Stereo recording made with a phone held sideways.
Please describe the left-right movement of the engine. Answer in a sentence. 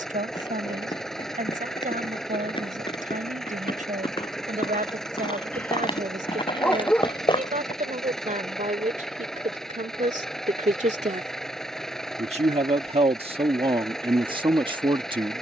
In this clip you hear the engine stay put.